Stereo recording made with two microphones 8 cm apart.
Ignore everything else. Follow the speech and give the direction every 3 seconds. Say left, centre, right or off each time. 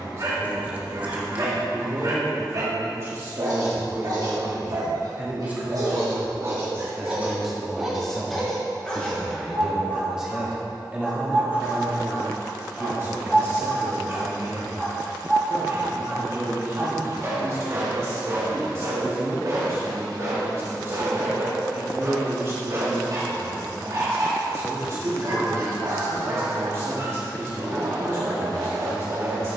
right, right, centre, centre, right, right, right, right, right, right.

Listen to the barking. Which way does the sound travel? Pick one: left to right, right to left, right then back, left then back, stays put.
left then back.